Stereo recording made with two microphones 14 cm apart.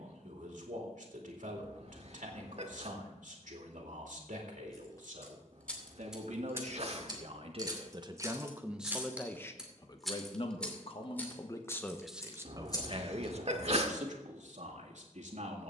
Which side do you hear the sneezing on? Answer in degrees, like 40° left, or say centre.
50° right.